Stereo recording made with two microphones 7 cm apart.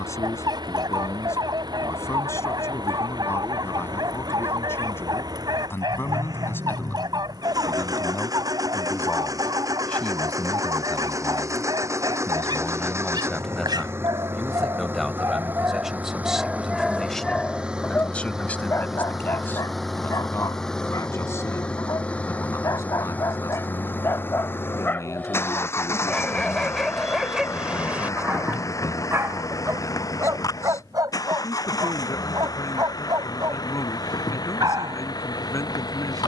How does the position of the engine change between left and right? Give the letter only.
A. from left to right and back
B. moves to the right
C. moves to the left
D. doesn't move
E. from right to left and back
C.